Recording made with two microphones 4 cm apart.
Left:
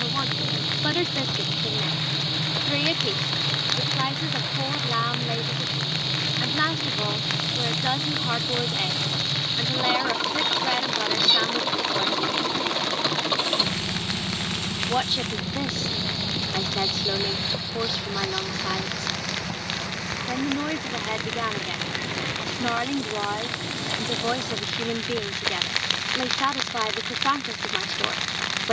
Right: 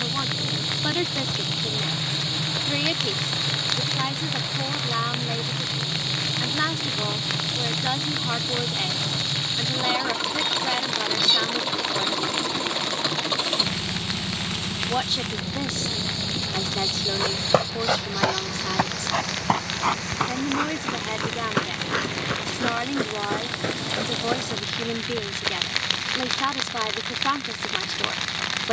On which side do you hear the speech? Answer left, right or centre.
centre.